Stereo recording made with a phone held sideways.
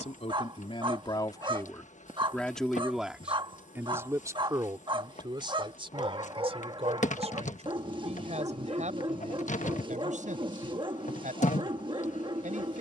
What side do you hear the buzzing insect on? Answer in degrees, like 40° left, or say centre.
50° left.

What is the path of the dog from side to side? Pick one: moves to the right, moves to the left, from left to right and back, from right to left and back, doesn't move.
doesn't move.